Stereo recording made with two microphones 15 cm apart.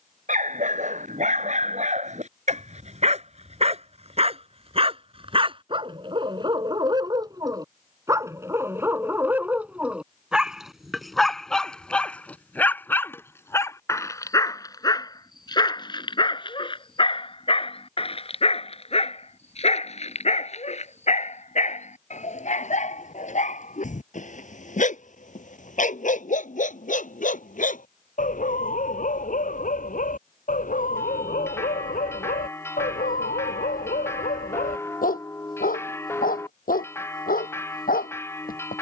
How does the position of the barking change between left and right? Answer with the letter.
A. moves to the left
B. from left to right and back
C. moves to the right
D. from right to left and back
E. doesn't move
A.